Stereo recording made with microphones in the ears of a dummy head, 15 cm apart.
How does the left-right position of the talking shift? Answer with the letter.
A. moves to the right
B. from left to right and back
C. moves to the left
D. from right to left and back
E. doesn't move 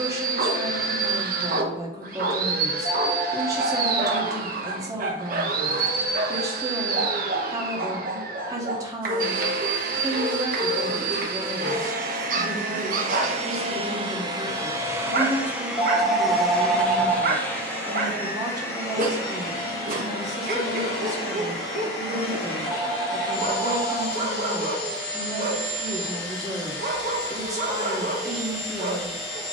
E.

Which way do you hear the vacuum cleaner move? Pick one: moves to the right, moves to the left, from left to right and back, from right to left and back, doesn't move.
moves to the left.